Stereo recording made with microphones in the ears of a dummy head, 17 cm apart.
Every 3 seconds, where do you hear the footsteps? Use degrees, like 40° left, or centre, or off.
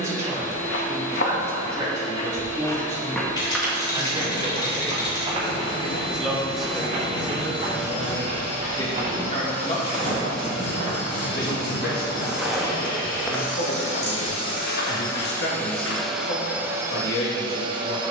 40° left, 20° right, 40° right, 30° right, 20° left, 70° left.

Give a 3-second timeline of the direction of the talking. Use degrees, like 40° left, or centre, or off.
20° right, 10° right, 10° left, 40° left, 60° left, 60° left.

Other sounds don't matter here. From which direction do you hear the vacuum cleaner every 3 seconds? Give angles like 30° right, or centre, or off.
60° left, 60° left, 60° left, 60° left, 40° left, 10° right.